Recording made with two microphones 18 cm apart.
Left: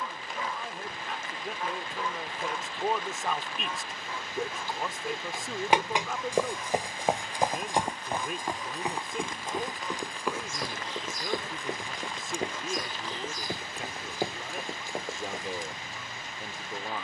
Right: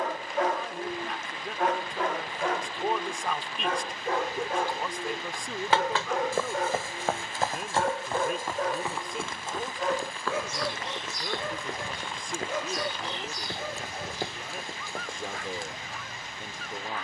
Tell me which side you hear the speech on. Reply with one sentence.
You can hear the speech in the centre.